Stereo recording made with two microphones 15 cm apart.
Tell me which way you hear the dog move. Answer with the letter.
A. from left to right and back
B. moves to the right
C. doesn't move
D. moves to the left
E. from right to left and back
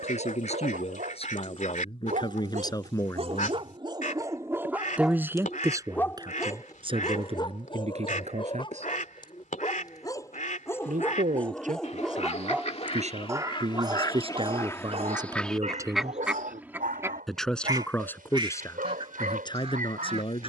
E.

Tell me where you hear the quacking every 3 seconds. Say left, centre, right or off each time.
left, left, left, left, left, centre, right.